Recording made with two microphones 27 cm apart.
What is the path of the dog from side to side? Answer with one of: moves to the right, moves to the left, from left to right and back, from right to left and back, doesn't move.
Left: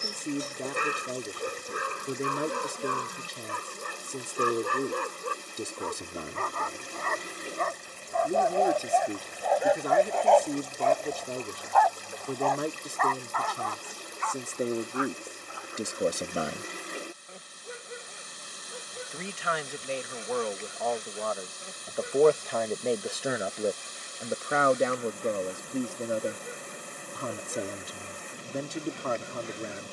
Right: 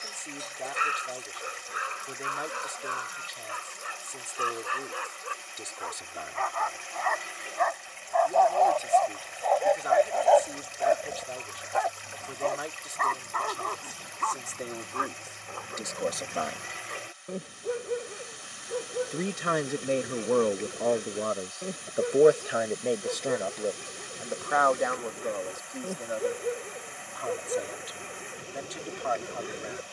moves to the right.